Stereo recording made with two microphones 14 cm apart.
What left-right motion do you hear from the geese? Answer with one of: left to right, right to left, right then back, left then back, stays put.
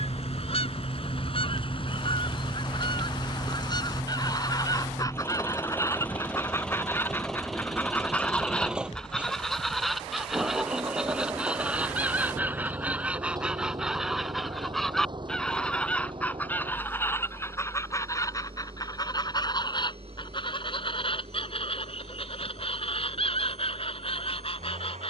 right then back.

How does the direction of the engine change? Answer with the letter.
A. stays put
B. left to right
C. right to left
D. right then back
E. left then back
B.